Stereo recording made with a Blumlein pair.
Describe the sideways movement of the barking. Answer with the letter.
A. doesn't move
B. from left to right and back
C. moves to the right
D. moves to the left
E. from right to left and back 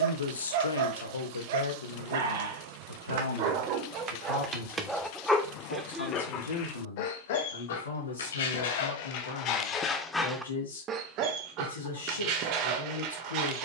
E.